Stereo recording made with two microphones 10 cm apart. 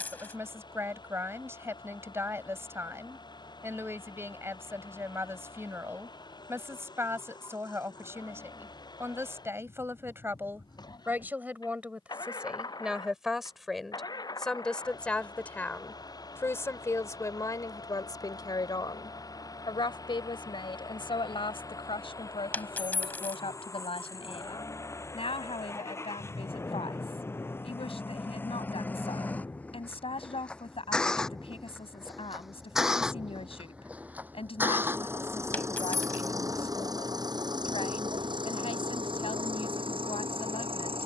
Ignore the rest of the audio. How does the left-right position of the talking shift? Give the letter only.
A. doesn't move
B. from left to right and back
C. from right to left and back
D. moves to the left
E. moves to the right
D.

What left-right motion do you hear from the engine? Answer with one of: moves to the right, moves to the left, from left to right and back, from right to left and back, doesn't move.
moves to the right.